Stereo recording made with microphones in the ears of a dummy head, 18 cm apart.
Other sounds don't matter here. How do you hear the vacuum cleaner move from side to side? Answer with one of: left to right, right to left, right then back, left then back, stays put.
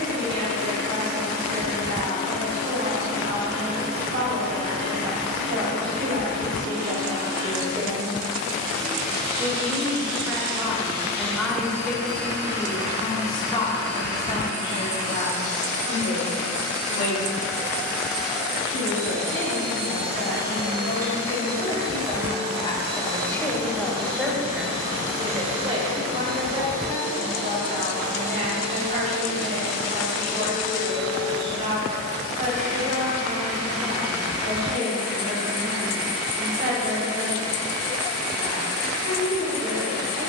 left to right.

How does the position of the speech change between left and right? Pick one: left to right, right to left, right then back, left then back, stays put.
left then back.